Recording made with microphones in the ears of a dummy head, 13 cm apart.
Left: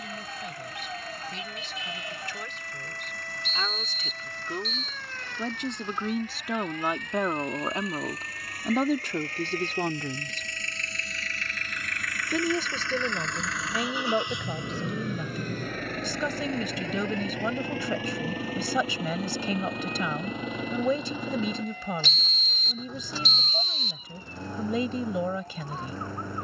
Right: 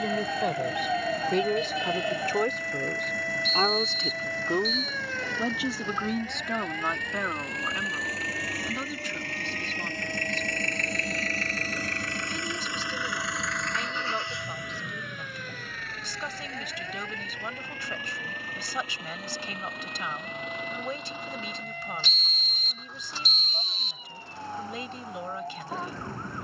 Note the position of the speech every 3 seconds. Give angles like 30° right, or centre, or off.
40° right, 20° right, 20° left, 50° left, 70° left, 80° left, 80° left, 80° left, 80° left.